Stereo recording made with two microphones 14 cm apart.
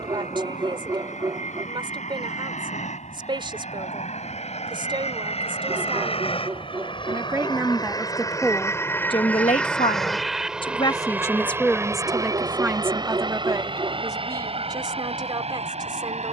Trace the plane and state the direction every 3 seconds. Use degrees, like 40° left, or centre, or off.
70° left, 60° left, 30° left, centre, 30° right, 40° right.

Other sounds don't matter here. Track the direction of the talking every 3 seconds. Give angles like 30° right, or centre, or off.
40° right, 40° right, 10° right, 30° left, 20° right, 30° right.